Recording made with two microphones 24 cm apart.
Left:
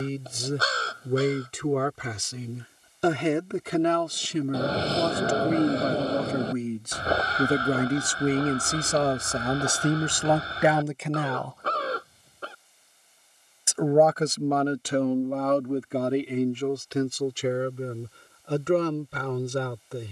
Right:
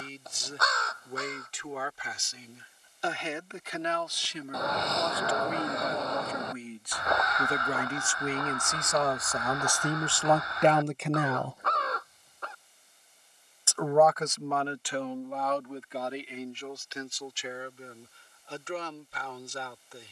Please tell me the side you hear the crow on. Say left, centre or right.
left.